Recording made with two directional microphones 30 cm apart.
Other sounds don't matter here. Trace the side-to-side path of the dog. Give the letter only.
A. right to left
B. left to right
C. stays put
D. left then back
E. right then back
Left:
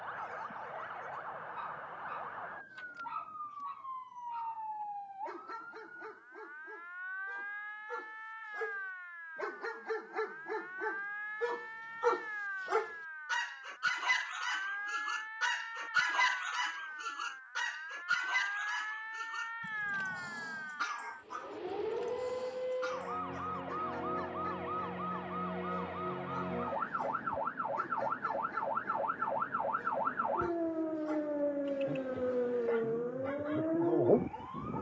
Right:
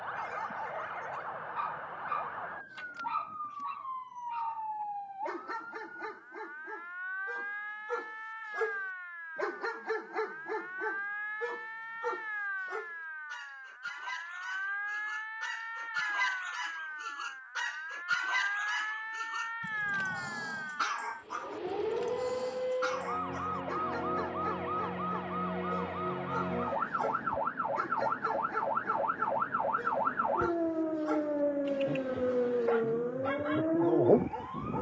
D.